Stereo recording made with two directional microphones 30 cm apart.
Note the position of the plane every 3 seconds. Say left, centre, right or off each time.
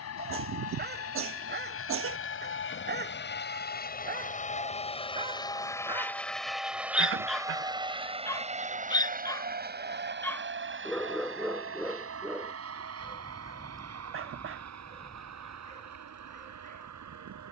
left, left, centre, right, right, right.